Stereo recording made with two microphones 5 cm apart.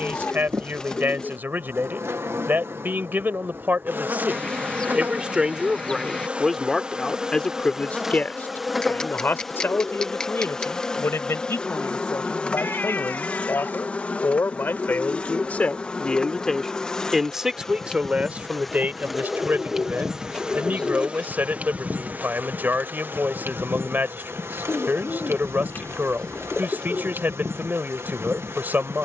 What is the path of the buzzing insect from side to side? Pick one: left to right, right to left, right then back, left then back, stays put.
left then back.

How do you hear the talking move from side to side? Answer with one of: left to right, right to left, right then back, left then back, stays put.
left then back.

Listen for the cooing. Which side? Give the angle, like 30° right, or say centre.
20° left.